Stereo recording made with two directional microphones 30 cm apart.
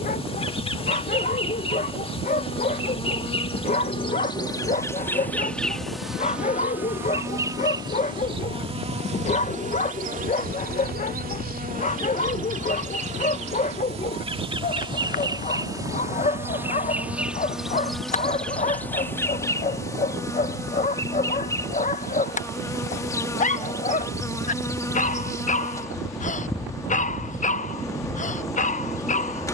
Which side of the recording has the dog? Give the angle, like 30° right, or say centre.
20° left.